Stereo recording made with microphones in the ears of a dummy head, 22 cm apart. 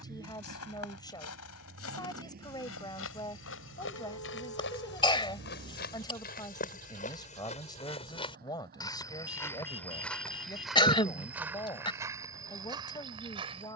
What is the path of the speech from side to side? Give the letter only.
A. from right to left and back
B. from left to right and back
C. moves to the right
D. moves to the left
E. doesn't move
E.